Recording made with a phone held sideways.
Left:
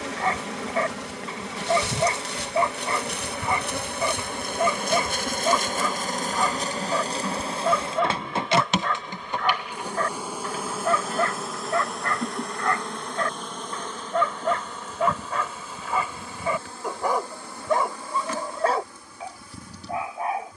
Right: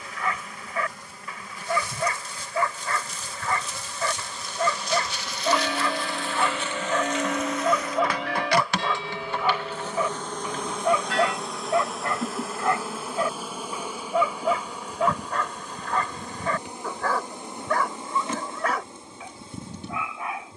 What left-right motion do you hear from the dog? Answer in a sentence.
In this clip you hear the dog move from left to right and back again.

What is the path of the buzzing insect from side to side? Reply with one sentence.
In this clip you hear the buzzing insect move to the right.